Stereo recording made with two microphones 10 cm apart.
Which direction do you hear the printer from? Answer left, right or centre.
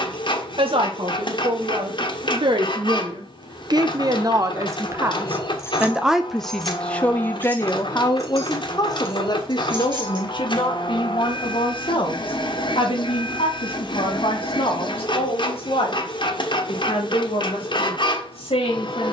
left.